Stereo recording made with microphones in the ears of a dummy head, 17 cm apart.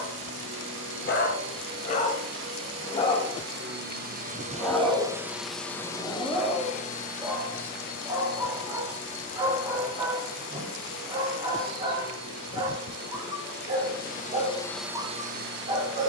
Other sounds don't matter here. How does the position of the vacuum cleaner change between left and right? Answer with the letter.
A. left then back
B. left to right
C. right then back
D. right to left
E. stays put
A.